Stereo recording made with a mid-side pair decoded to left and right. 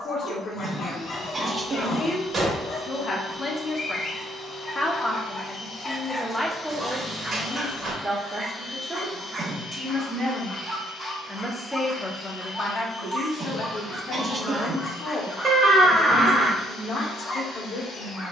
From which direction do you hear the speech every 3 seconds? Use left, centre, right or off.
left, left, centre, centre, left, left.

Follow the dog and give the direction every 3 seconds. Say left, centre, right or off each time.
left, left, centre, right, centre, left.